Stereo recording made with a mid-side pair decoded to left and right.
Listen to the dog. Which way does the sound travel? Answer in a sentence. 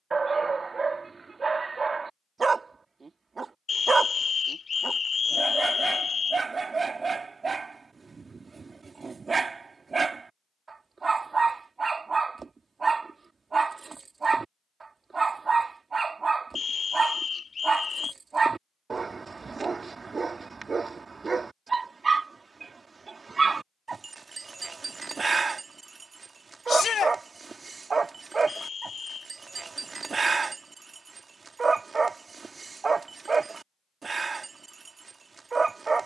In this clip you hear the dog stay in one place.